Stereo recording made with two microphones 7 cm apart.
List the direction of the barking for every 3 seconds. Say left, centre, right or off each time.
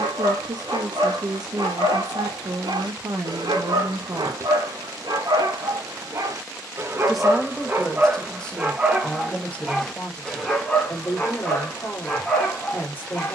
right, right, right, centre, centre.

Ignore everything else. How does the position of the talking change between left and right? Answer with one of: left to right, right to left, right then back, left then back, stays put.
right to left.